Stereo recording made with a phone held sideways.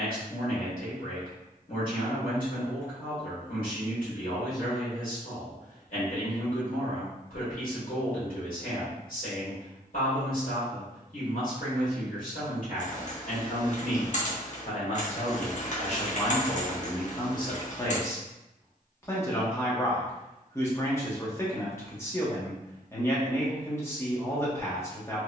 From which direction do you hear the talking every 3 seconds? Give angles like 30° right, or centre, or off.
70° left, 70° left, 70° left, 70° left, 60° left, 40° left, 20° left, 20° left, 20° left.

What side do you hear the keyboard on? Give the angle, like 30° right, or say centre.
50° left.